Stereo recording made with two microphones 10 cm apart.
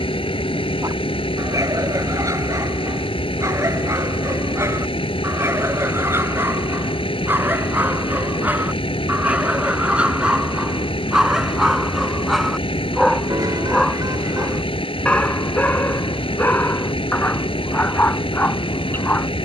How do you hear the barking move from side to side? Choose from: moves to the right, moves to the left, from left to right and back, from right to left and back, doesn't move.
moves to the left.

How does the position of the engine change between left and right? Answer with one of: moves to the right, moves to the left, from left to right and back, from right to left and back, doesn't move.
doesn't move.